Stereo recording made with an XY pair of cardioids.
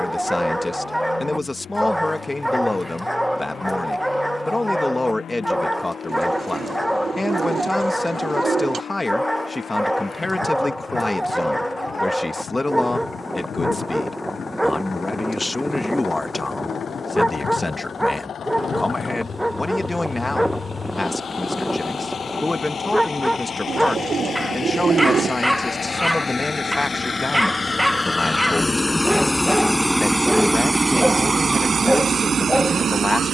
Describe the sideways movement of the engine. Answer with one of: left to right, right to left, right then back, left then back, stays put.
left to right.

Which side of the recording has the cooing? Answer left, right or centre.
right.